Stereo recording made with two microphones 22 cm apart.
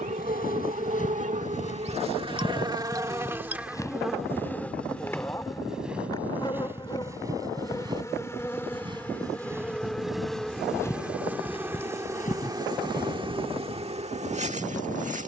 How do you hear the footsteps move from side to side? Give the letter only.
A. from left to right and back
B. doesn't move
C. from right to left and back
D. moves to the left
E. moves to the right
A.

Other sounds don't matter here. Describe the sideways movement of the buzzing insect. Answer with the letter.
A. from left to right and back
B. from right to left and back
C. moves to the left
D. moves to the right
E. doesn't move
B.